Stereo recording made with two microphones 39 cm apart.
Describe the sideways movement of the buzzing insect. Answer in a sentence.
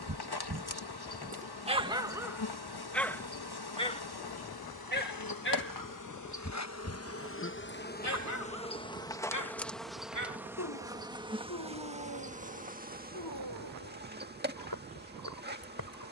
In this clip you hear the buzzing insect move to the right.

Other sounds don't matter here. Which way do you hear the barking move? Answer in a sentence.
In this clip you hear the barking move to the left.